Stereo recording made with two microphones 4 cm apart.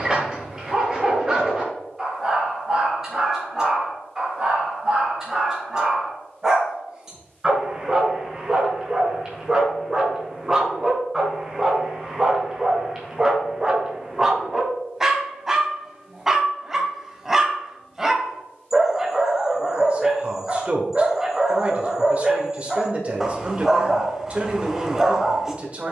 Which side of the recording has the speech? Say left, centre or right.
right.